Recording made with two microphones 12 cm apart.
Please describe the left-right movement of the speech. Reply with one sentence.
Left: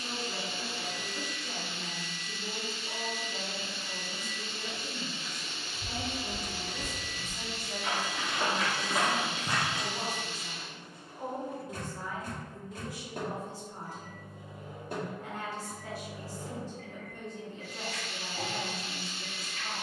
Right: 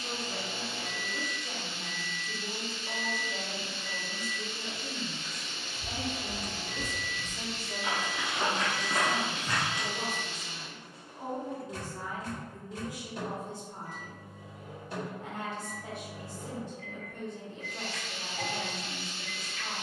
You can hear the speech go left and come back.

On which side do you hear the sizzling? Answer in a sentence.
In this clip you hear the sizzling in the centre.